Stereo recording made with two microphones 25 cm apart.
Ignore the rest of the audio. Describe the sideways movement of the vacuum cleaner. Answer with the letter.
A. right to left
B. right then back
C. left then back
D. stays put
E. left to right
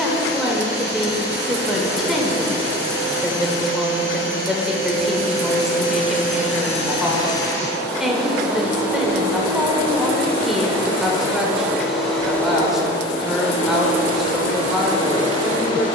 B.